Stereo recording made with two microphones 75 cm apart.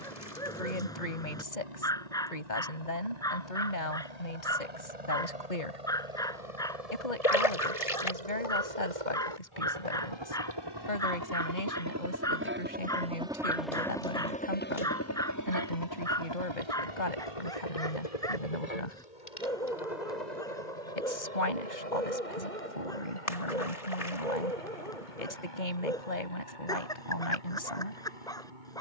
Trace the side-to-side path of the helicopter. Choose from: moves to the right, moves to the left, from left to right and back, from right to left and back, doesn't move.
moves to the left.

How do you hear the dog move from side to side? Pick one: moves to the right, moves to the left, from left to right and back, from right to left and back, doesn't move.
doesn't move.